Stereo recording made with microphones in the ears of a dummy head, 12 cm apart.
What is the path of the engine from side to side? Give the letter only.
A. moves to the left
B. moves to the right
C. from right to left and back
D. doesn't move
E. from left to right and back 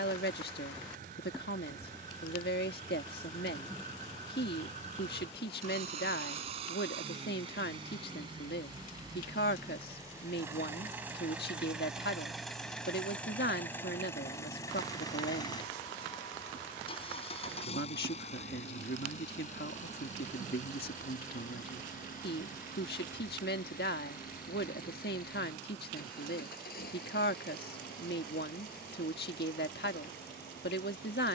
A.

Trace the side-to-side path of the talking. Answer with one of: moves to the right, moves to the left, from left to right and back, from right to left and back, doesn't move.
doesn't move.